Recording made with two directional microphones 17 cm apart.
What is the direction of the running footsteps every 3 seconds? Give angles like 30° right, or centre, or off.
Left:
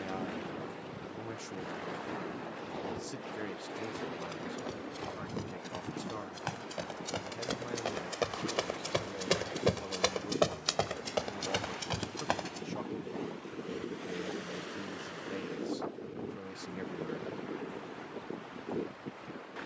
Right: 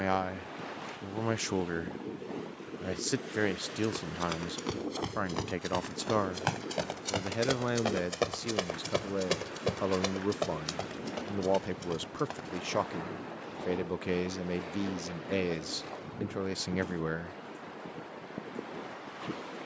off, 50° right, 30° right, 30° left, 60° left, off, off.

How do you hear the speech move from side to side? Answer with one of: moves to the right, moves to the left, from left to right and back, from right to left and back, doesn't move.
doesn't move.